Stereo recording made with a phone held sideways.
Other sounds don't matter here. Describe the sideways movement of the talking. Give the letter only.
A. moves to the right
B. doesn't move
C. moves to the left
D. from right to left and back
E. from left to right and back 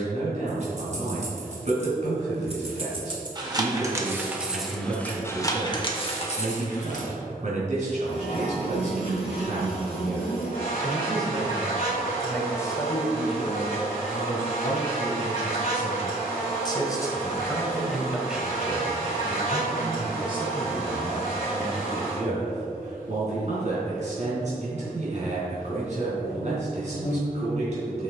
D.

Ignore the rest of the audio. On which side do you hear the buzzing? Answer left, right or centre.
left.